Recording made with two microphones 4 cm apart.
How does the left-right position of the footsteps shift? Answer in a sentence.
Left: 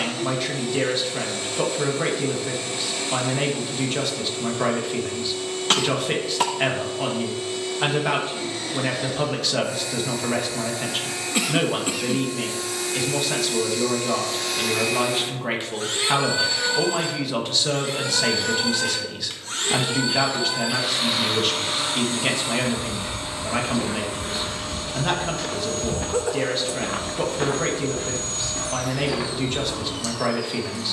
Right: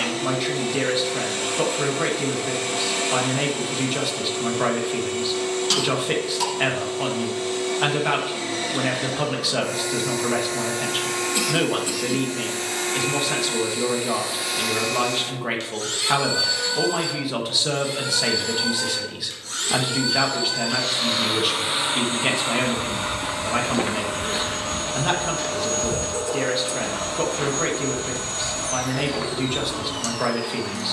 You can hear the footsteps move from right to left.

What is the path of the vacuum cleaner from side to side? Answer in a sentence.
In this clip you hear the vacuum cleaner go left and come back.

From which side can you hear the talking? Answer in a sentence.
In this clip you hear the talking in the centre.